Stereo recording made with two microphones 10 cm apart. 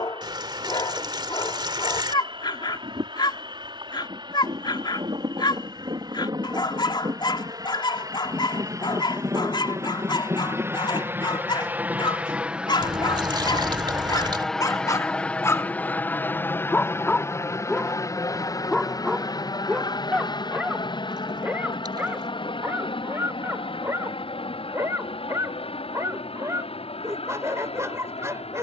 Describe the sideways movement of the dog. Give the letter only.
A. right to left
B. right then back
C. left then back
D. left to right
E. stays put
D.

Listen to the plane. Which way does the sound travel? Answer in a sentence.
In this clip you hear the plane travel towards the left.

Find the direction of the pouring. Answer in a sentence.
In this clip you hear the pouring on the right.